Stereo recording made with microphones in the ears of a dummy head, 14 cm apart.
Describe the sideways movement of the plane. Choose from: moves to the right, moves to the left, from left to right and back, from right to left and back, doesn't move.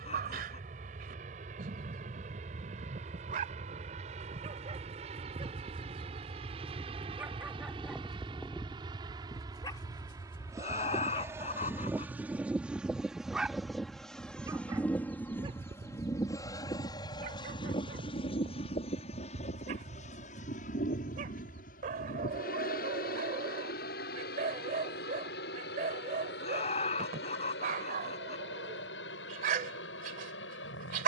moves to the left.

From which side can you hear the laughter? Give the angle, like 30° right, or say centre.
40° left.